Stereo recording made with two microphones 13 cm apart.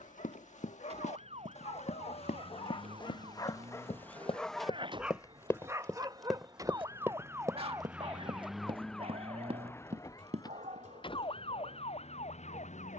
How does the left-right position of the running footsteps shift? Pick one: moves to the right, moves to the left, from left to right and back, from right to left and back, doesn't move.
moves to the right.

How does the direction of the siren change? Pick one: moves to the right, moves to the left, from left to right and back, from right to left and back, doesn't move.
moves to the left.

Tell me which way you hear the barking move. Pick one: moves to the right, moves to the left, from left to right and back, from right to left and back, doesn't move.
moves to the right.